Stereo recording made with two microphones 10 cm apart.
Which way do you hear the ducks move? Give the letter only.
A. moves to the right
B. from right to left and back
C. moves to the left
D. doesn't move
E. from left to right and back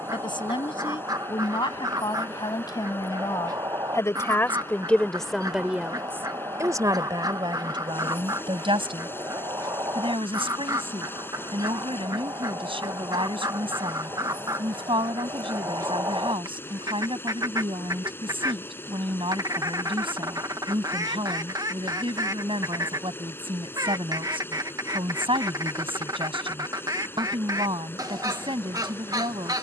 D.